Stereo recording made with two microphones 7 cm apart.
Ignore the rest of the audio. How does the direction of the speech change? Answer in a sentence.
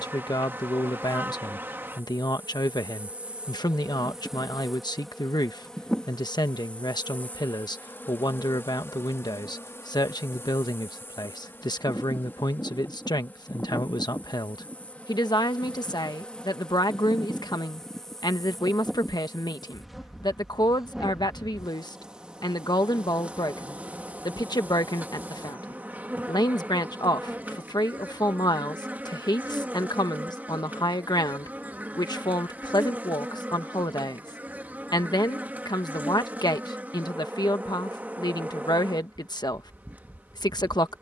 In this clip you hear the speech stay in one place.